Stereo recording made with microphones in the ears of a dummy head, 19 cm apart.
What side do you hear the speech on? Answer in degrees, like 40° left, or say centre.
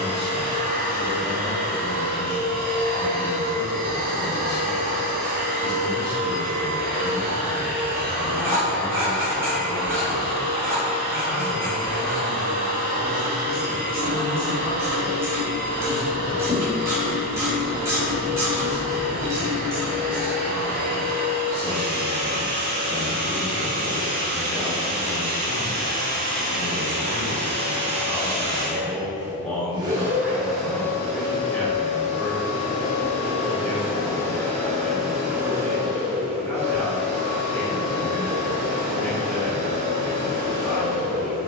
10° left.